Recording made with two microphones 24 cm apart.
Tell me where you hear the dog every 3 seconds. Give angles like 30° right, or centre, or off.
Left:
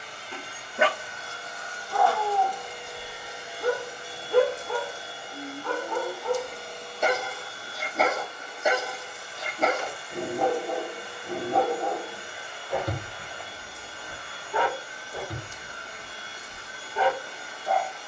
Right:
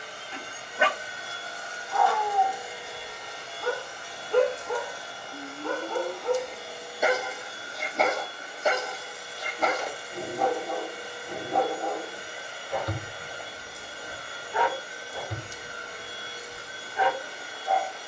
60° left, centre, centre, 30° left, 60° left, 70° left.